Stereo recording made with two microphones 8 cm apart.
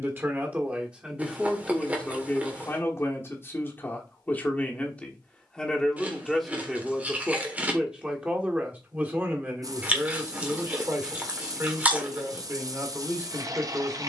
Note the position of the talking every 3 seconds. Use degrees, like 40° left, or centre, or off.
centre, 20° left, 10° right, 30° right, 30° right.